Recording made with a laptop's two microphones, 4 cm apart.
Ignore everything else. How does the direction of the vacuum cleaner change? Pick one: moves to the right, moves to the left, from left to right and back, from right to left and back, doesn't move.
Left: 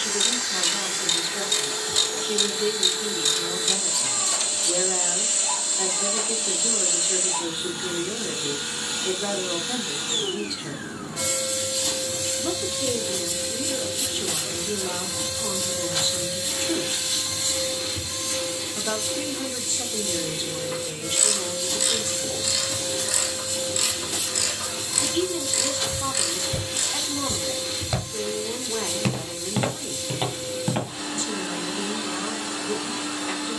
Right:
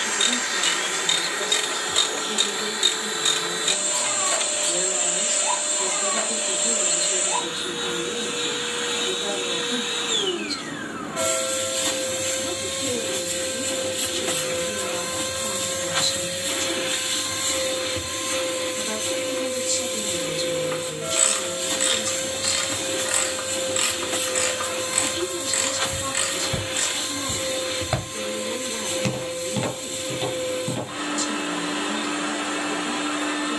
doesn't move.